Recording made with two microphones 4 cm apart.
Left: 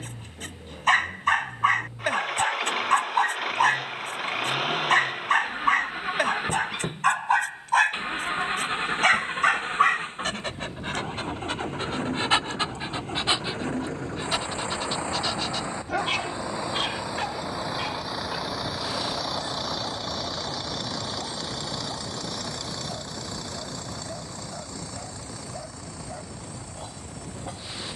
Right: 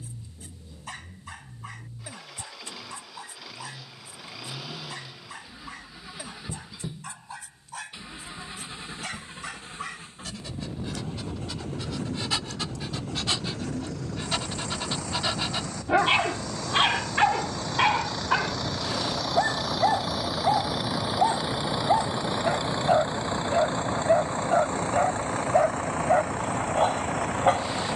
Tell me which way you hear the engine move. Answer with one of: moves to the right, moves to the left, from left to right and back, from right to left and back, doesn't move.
moves to the right.